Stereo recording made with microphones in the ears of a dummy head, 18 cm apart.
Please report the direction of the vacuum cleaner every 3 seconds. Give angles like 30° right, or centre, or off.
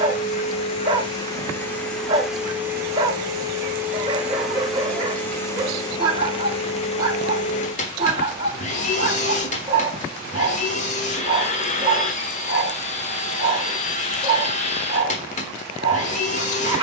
10° left, centre, 30° left, 40° left, 40° left, 40° left.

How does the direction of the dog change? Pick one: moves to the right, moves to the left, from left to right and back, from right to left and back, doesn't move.
doesn't move.